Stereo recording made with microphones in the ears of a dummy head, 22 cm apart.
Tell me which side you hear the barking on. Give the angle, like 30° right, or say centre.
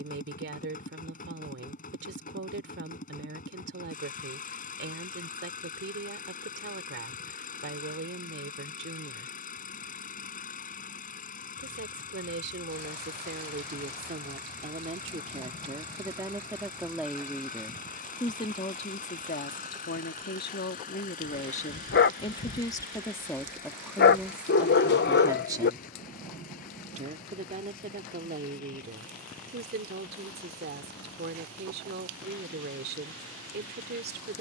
50° left.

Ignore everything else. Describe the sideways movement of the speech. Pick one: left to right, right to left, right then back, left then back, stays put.
left then back.